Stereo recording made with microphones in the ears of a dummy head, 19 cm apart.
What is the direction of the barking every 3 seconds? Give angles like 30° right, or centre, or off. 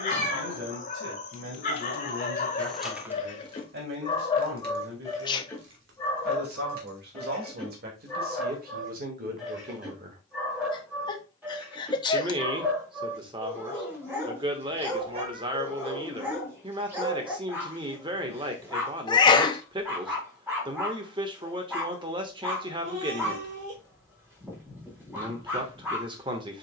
40° left, 20° left, centre, 10° right, 10° right, 10° right, 10° right, 10° right, 10° right.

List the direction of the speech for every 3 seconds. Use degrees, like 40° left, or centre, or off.
60° right, 60° right, 50° right, 40° right, 20° right, 20° right, 20° right, 20° right, 20° right.